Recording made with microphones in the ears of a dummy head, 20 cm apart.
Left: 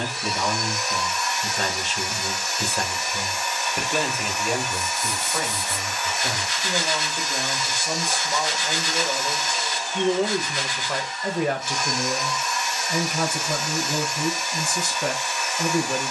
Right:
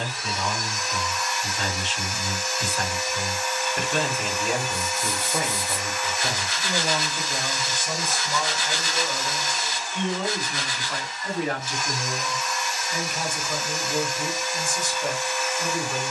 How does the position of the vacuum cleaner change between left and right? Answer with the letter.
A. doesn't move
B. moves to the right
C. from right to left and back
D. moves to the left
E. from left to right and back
A.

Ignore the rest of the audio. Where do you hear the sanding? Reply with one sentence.
In this clip you hear the sanding on the right.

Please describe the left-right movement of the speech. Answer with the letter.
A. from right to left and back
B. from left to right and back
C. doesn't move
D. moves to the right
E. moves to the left
B.